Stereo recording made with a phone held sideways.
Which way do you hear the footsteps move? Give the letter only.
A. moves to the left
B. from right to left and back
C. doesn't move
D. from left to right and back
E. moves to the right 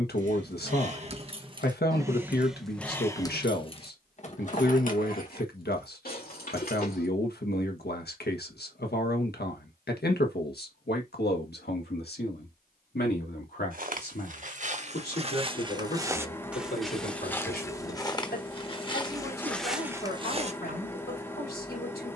B.